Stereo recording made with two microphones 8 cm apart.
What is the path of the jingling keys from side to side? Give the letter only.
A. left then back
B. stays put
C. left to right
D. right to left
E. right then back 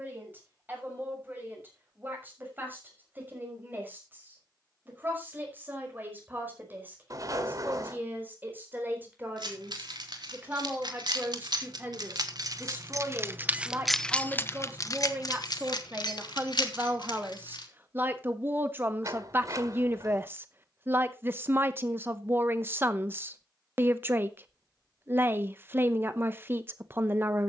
D.